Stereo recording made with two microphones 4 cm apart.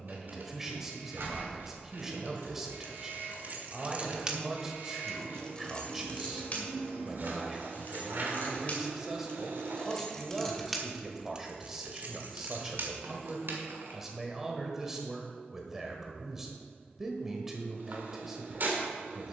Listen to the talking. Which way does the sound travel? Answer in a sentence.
In this clip you hear the talking stay in one place.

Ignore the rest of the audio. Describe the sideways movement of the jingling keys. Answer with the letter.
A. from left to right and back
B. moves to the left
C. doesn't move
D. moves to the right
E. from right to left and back
E.